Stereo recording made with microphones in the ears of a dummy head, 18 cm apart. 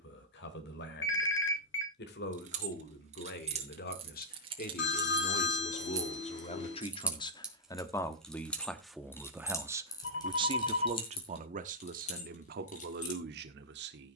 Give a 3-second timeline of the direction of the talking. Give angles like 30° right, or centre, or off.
60° left, 50° left, 20° left, 20° right, 50° right.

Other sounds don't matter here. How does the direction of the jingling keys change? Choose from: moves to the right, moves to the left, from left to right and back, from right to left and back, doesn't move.
moves to the left.